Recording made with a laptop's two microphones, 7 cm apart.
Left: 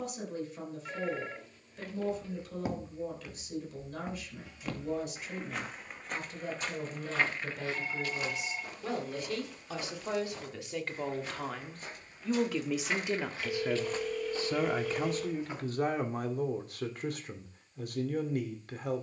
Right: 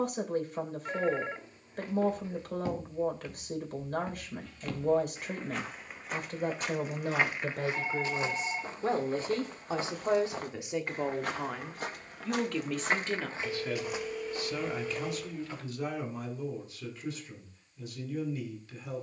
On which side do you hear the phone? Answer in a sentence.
You can hear the phone on the right.